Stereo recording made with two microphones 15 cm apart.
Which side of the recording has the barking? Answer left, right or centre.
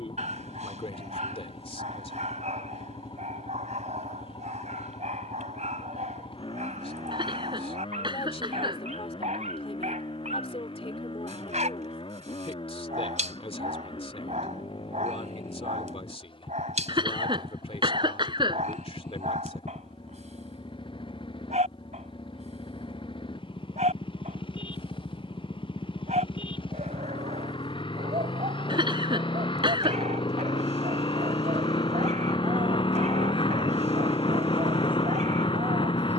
right.